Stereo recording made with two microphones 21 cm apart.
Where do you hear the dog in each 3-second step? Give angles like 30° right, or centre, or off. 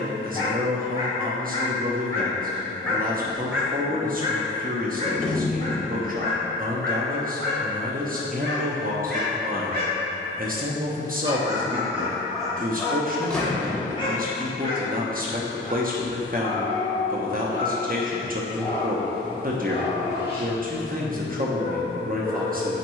20° left, 20° right, 60° right, 30° right, 10° left, 30° left, 30° left, 30° left.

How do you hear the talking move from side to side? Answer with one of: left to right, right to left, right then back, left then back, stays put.
stays put.